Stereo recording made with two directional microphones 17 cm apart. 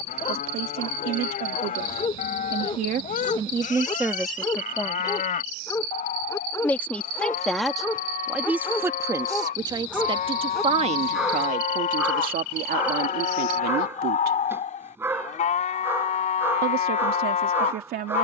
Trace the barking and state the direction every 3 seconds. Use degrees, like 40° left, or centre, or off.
30° left, 20° left, 10° left, centre, 10° right, 10° right.